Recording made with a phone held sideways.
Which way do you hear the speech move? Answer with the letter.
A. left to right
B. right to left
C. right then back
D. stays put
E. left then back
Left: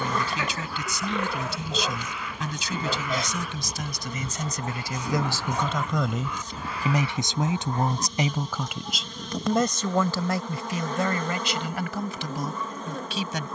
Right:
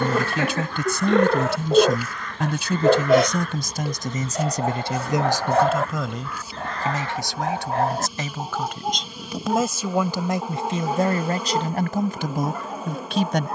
E.